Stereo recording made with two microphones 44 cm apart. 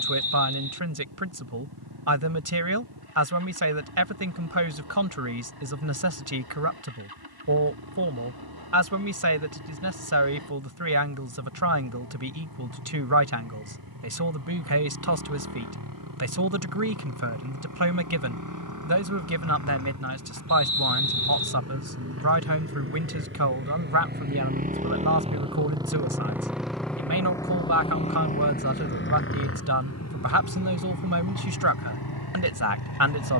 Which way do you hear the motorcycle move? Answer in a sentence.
In this clip you hear the motorcycle go from the right side to the left.